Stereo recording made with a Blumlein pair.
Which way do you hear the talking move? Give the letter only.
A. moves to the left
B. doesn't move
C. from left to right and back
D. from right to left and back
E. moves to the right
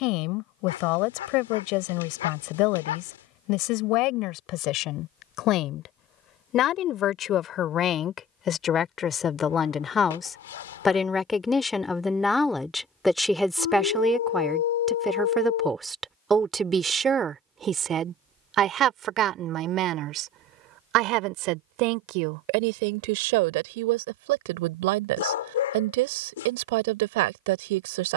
E.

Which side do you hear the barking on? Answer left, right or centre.
left.